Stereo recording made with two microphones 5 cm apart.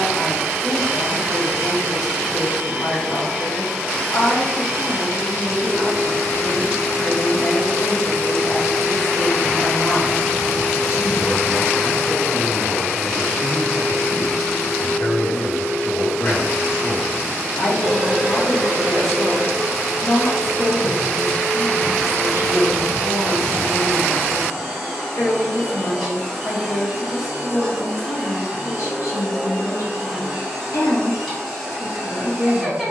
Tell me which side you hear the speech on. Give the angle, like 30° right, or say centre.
70° left.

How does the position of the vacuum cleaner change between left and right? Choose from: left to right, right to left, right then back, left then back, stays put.
stays put.